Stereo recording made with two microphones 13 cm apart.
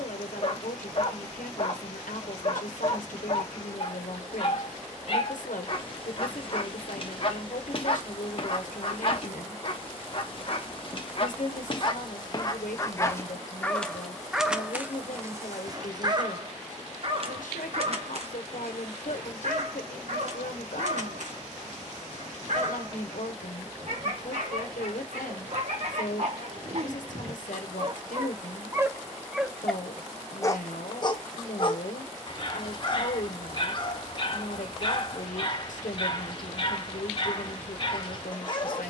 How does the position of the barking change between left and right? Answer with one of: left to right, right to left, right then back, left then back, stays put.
right then back.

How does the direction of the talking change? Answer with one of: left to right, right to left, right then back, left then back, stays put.
stays put.